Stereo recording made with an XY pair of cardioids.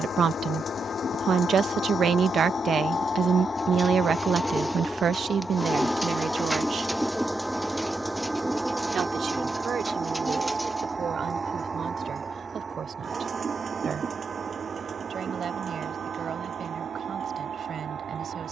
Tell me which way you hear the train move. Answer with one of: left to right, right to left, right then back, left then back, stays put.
left to right.